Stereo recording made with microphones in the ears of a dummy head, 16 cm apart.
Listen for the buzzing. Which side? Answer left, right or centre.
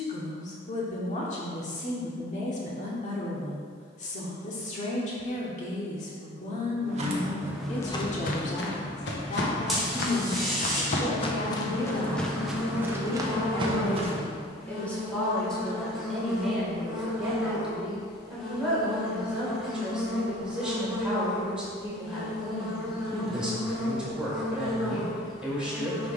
centre.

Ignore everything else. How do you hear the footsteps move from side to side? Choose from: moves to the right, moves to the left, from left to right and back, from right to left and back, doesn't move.
from right to left and back.